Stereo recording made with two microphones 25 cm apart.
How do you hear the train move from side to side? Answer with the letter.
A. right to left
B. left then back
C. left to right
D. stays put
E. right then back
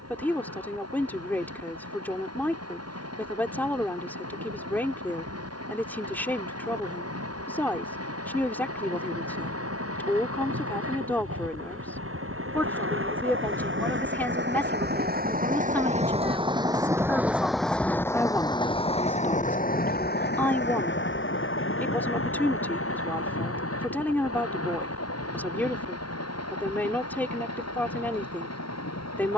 A.